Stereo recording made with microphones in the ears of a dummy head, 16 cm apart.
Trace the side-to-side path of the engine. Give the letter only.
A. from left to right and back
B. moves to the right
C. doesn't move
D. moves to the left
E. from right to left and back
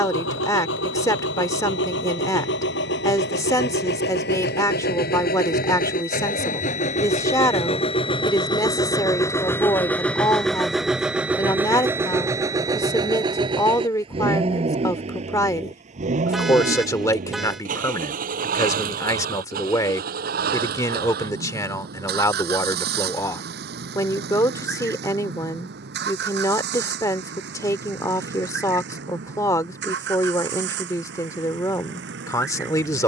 B.